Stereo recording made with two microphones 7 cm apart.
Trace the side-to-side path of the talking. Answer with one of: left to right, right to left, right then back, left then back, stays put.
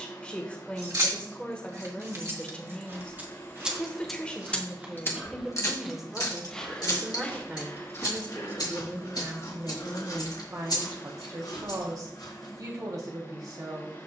left to right.